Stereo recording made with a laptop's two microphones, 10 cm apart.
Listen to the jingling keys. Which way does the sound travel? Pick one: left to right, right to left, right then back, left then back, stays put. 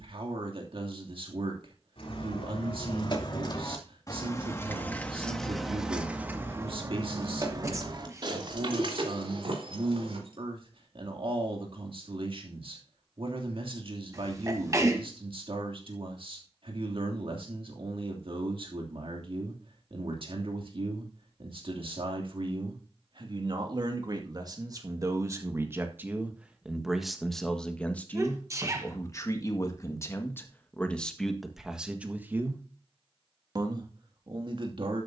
left to right.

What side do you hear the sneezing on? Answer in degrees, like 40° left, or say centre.
30° right.